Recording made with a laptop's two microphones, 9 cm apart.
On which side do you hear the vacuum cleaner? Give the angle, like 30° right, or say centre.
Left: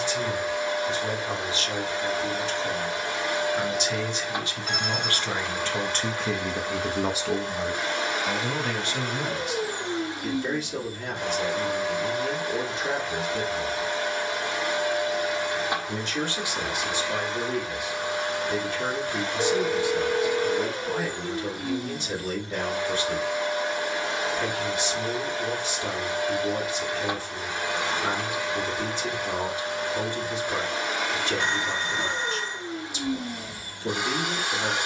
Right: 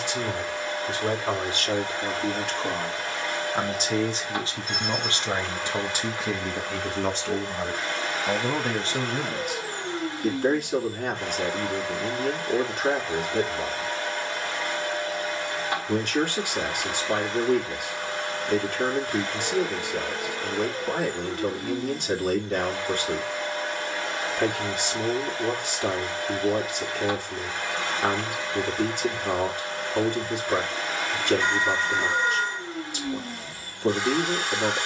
20° left.